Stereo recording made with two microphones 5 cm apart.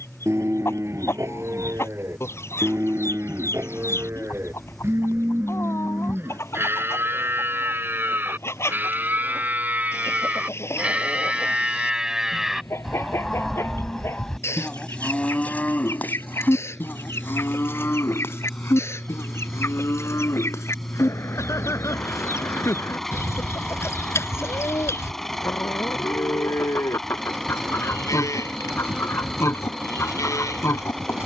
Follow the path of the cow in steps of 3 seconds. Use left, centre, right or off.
right, right, right, right, centre, left, left, left, left, left, left.